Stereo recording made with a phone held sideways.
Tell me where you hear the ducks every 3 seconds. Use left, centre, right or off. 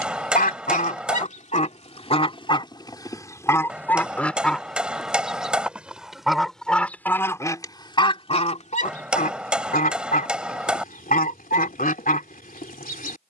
left, centre, left, left, left.